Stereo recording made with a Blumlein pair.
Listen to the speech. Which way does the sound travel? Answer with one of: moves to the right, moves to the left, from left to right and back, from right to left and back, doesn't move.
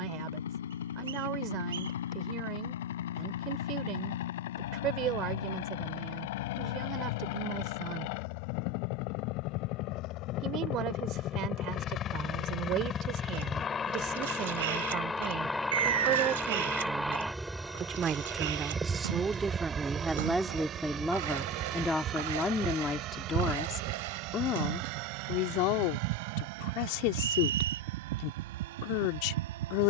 moves to the left.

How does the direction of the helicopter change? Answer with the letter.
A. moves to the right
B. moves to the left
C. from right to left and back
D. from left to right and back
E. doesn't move
A.